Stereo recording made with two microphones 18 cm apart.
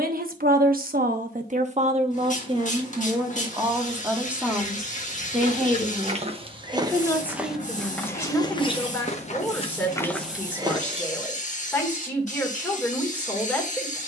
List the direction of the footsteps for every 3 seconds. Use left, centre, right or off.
off, right, centre, centre, off.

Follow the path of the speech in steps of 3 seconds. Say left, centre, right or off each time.
right, centre, centre, centre, centre.